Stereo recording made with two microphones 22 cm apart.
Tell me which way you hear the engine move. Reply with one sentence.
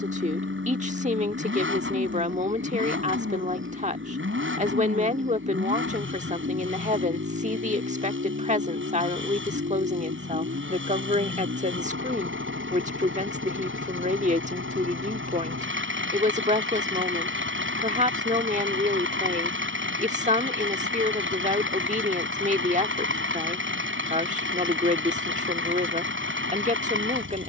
In this clip you hear the engine stay put.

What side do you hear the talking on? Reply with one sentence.
In this clip you hear the talking on the right.